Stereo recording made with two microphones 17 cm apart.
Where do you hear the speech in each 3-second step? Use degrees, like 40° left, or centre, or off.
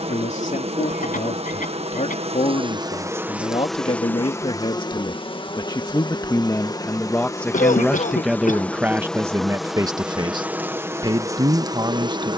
40° left, 30° left, 10° left, 20° right.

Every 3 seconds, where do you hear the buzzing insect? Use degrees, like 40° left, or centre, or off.
40° right, 10° left, 20° left, 10° right.